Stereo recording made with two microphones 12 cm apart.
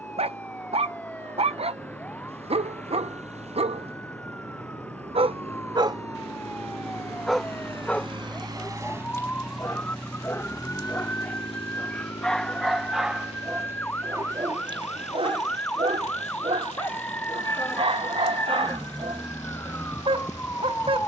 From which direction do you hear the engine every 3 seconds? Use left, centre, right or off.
right, right, right, left, left, left, left.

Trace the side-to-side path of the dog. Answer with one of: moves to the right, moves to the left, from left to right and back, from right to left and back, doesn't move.
from right to left and back.